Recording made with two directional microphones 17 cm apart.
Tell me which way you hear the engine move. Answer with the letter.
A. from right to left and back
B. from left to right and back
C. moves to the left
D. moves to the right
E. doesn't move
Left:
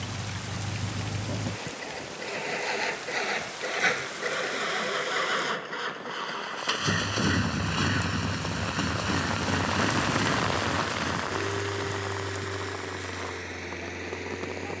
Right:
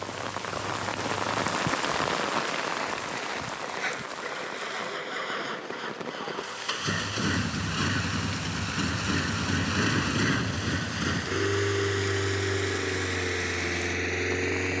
D.